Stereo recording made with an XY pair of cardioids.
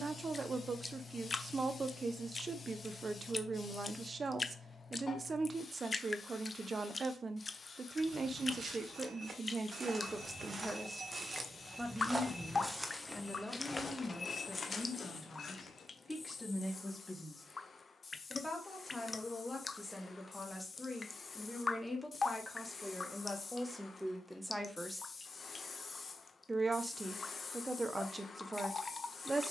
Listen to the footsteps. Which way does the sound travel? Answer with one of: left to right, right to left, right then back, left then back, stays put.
right to left.